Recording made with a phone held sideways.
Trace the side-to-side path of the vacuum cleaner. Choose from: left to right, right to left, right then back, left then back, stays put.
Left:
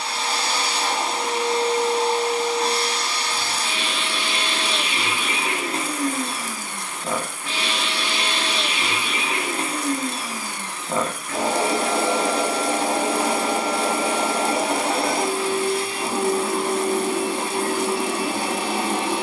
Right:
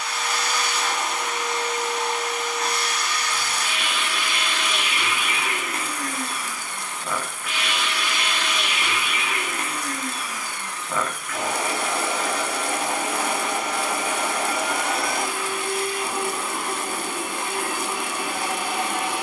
stays put.